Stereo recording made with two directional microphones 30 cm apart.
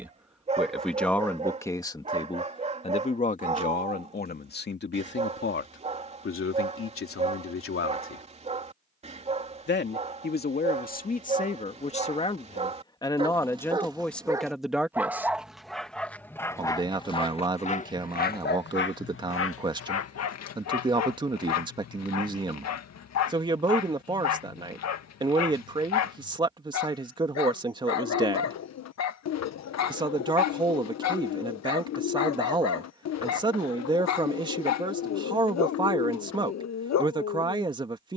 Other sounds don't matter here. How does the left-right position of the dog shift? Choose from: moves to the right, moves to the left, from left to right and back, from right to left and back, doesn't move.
moves to the left.